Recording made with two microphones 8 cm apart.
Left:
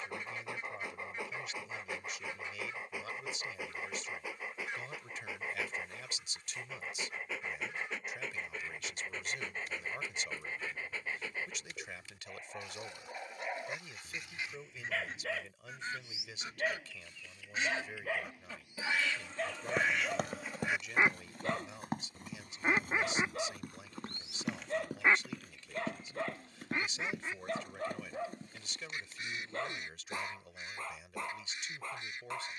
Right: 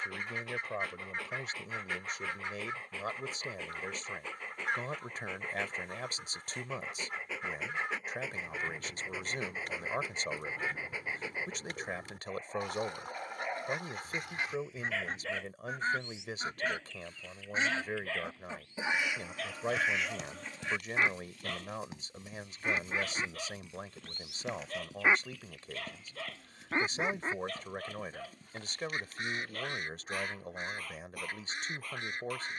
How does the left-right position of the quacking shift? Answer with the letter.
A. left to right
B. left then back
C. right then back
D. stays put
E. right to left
B.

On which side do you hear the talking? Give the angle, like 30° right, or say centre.
50° right.